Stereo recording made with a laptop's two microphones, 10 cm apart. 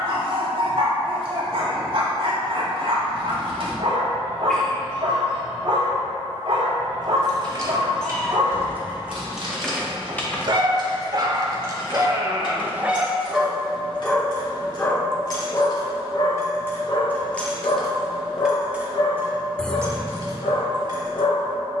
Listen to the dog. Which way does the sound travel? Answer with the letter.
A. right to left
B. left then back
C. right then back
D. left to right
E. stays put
A.